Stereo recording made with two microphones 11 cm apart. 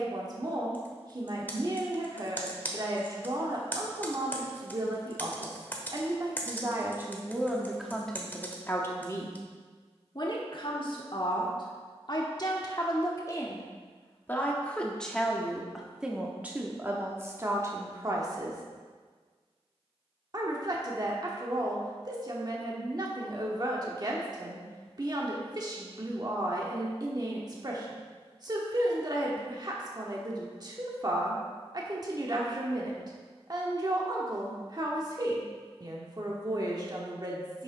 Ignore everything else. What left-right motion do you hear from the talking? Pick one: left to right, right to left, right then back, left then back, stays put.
left then back.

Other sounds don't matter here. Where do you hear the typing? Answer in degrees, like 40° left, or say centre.
20° left.